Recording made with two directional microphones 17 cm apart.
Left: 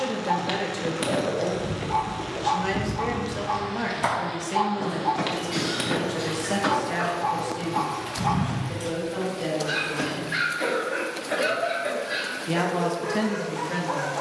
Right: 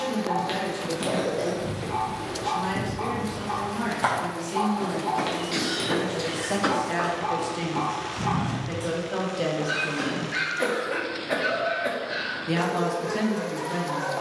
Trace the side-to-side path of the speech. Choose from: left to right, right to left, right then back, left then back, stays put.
right then back.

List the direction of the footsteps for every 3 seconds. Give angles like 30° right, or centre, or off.
20° left, 10° right, 10° right, 10° left, off.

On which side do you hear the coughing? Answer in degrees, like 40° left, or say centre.
40° right.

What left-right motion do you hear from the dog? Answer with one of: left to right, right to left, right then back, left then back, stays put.
stays put.